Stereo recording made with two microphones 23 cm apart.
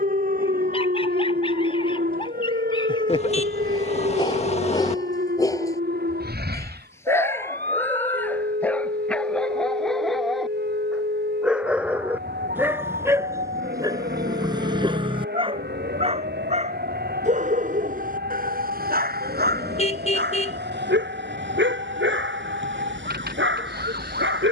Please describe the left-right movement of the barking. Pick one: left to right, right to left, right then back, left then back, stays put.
left to right.